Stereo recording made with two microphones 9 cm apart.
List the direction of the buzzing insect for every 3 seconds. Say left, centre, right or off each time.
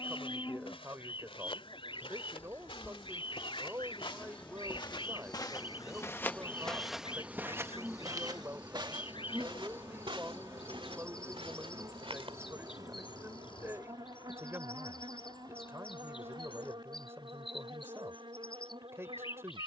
left, centre, centre, right, right, right, right.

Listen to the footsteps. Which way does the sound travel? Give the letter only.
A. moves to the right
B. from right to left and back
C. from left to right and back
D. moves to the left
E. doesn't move
A.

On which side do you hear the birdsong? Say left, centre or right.
left.